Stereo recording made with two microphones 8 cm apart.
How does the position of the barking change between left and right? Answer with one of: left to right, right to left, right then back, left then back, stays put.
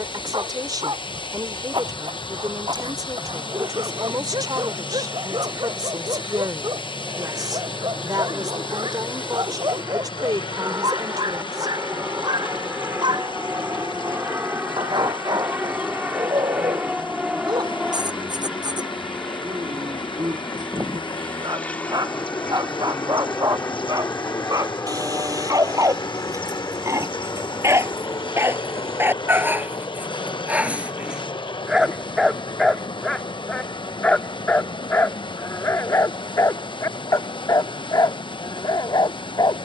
right to left.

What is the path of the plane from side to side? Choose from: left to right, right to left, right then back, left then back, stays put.
right to left.